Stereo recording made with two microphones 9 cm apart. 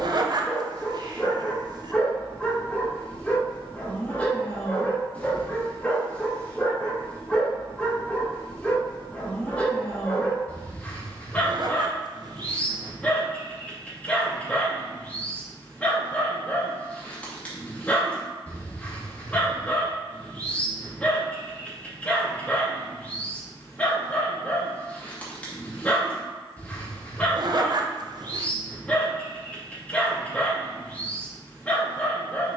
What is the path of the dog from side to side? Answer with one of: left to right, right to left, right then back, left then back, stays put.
stays put.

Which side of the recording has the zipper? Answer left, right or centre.
right.